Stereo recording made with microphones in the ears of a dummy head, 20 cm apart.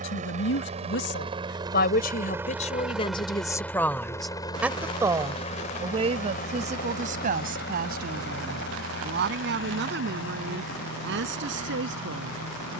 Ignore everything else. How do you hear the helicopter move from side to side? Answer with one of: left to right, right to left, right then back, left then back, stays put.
right to left.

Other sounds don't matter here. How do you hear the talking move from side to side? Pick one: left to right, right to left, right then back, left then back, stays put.
left to right.